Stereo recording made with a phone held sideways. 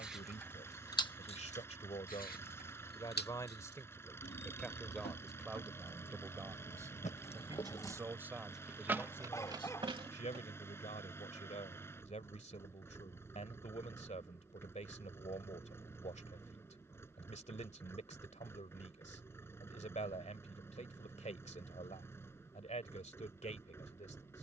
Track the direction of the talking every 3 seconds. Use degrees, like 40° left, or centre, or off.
40° left, 10° left, 10° right, 40° left, 40° left, 40° left, 40° left, 40° left.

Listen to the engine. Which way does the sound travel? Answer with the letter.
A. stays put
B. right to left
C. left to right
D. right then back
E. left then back
A.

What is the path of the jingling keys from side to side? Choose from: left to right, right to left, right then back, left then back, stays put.
left then back.